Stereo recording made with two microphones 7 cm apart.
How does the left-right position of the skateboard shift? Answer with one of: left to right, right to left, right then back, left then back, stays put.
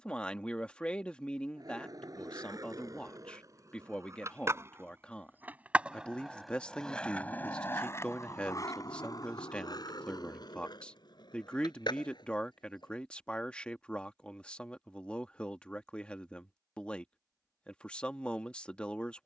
right to left.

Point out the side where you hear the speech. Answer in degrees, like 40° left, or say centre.
20° left.